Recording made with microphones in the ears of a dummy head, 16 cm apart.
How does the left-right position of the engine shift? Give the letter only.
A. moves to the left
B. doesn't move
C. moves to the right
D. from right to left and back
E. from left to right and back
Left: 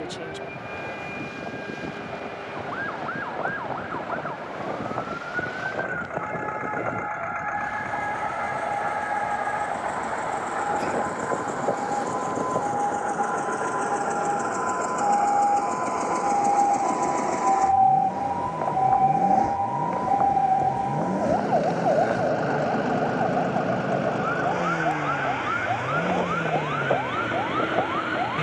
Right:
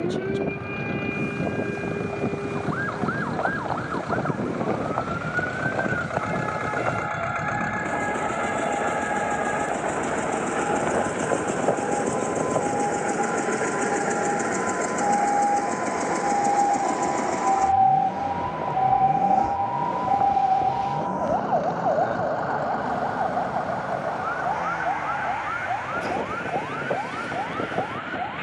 A.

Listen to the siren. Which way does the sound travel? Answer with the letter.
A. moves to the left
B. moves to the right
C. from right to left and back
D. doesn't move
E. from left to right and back
A.